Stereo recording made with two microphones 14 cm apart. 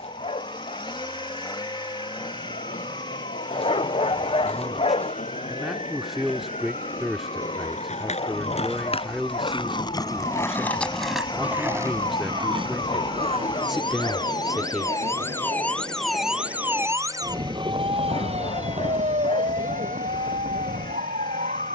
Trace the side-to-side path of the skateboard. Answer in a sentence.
You can hear the skateboard go from the left side to the right.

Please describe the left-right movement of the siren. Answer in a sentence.
You can hear the siren travel towards the right.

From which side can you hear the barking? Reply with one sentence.
In this clip you hear the barking on the left.